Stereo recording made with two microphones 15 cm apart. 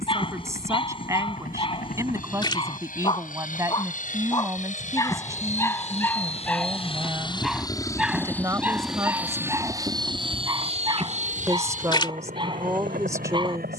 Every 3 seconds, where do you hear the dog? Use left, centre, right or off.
left, left, centre, right, right.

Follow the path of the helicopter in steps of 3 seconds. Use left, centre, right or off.
left, left, left, right, right.